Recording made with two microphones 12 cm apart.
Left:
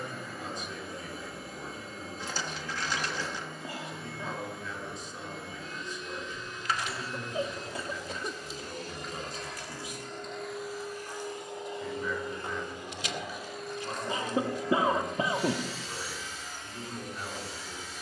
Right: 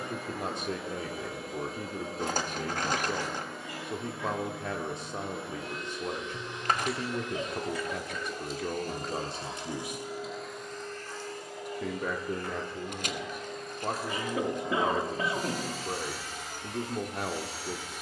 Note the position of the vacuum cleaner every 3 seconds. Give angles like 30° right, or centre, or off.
80° right, 80° right, 70° right, centre, centre, 60° right.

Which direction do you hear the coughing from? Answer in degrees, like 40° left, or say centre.
30° left.